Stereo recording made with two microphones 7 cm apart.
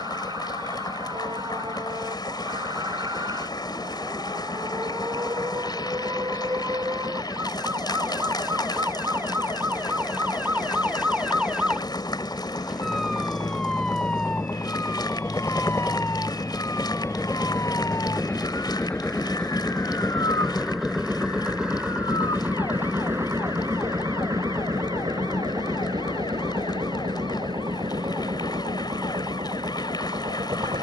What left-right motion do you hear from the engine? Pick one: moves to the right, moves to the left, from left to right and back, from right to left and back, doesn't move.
moves to the right.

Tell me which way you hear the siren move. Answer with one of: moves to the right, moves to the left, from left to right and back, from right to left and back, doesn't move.
moves to the left.